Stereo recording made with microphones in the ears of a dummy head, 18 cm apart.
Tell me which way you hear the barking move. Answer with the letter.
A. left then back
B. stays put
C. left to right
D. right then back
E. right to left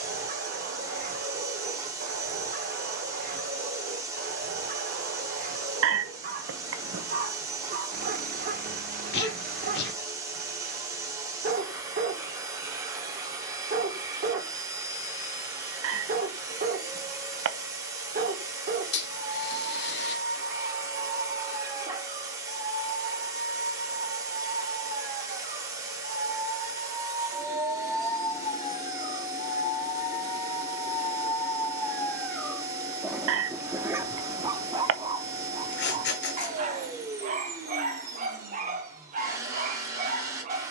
A.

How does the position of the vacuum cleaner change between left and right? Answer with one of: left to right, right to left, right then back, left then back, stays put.
stays put.